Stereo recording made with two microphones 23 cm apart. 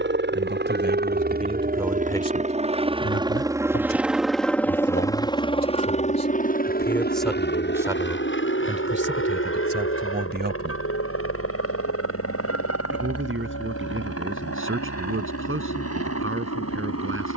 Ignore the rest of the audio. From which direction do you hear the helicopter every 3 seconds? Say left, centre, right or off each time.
right, centre, left, left, left, left.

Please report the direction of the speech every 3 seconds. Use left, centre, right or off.
right, left, centre, right, right, right.